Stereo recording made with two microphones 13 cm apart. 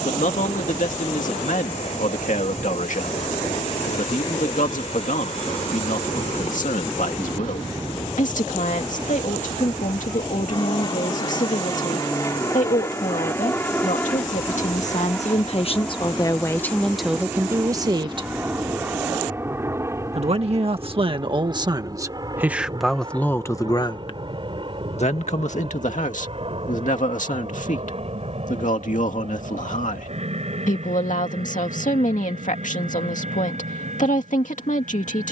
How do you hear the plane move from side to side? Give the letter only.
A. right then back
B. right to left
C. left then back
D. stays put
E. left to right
E.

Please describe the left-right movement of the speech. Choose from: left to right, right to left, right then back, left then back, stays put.
right then back.